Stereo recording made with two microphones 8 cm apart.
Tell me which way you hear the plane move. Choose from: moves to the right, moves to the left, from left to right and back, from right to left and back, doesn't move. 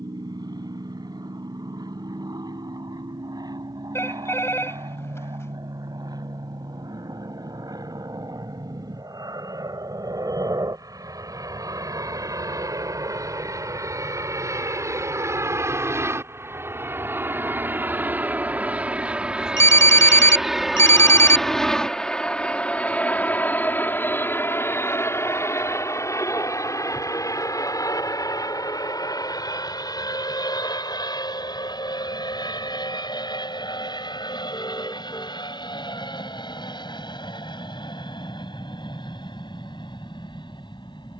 moves to the left.